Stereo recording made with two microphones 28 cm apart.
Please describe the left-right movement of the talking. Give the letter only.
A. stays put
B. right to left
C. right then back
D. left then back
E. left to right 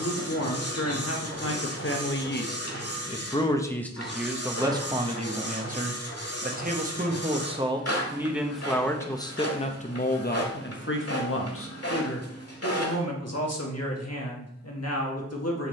C.